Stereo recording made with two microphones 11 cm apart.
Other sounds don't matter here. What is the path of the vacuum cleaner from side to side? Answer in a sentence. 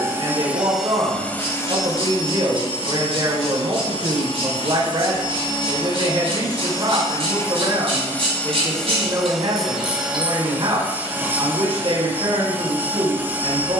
In this clip you hear the vacuum cleaner go left and come back.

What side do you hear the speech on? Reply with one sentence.
You can hear the speech on the right.